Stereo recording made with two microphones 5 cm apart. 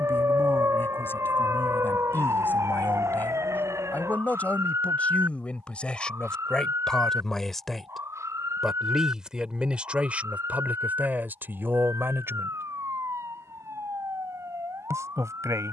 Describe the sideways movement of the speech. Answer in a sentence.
In this clip you hear the speech move from left to right.